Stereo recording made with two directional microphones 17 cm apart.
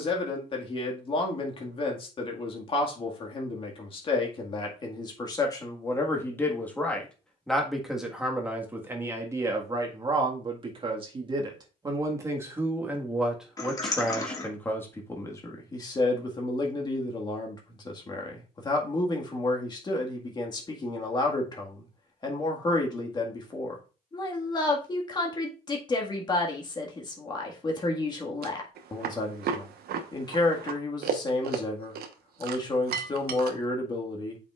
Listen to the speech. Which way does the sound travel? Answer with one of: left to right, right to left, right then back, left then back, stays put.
right then back.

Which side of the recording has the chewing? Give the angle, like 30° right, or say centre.
70° right.